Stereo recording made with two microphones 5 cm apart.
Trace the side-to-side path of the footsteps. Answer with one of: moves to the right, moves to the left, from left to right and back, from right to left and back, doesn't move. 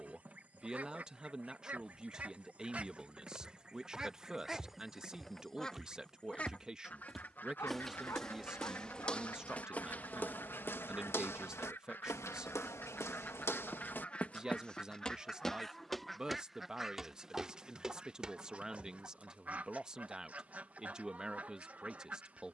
from right to left and back.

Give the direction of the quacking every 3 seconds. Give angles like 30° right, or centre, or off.
30° right, centre, 40° left, 50° left, 30° left, centre, 30° right, 30° right.